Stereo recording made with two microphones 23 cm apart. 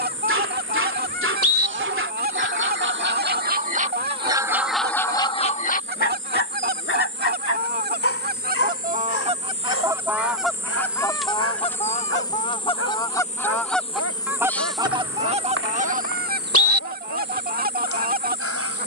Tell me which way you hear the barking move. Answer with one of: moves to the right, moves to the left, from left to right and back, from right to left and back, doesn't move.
moves to the left.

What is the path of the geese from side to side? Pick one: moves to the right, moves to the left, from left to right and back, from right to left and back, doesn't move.
from right to left and back.